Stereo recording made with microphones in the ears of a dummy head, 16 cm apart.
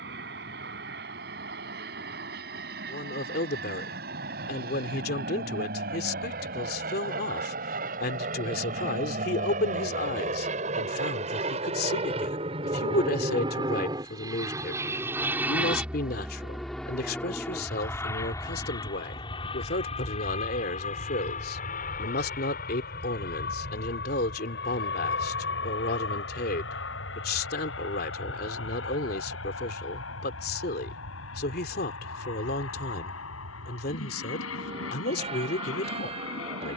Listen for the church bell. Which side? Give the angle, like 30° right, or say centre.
30° right.